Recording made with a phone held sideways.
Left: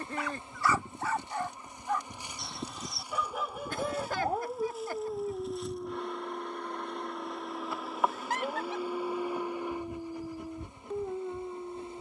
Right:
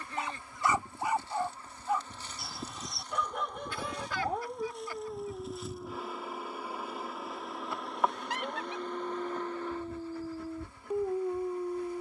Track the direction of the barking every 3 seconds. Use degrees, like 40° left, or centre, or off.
10° right, 10° left, 30° left, 10° right.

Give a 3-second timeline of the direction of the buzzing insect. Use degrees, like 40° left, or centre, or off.
20° left, centre, centre, 20° left.